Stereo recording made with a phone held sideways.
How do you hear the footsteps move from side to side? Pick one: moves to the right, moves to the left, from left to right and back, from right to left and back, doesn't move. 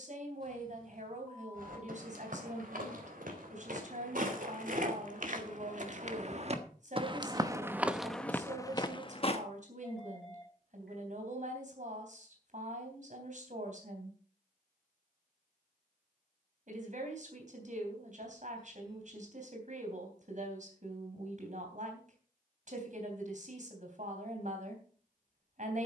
moves to the left.